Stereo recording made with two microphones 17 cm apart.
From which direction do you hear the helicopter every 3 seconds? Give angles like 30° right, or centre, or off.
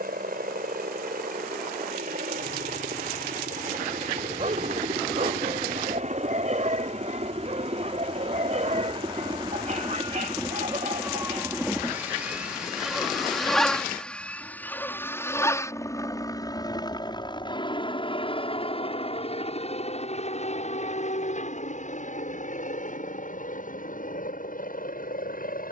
60° right, 50° right, 40° right, 20° right, centre, 20° left, 40° left, 50° left, 50° left.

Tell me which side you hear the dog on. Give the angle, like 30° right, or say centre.
50° right.